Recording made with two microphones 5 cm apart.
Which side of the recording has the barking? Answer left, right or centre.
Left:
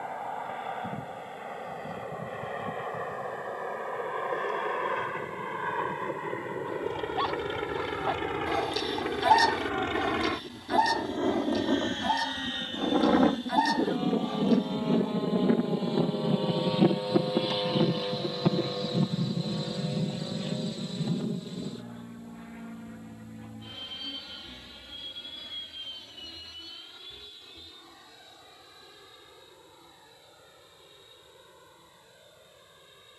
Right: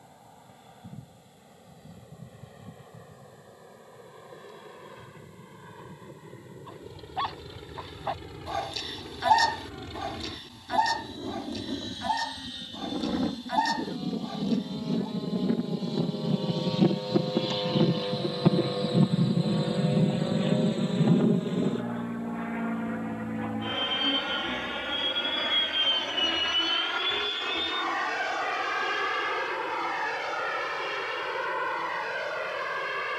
centre.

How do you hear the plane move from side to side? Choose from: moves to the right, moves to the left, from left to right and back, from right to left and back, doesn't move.
moves to the right.